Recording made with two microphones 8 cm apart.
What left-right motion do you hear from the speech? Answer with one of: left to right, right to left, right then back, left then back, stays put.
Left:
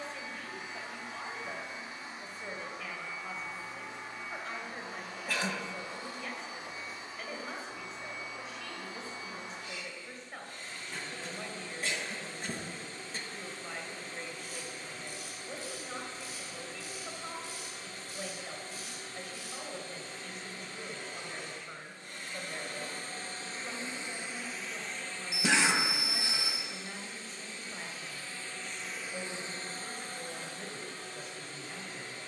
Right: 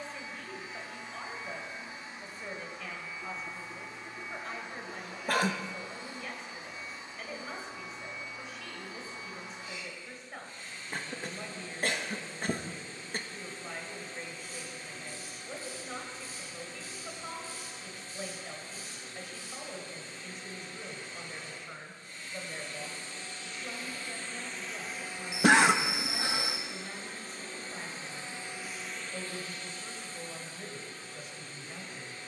stays put.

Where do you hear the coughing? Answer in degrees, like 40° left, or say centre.
50° right.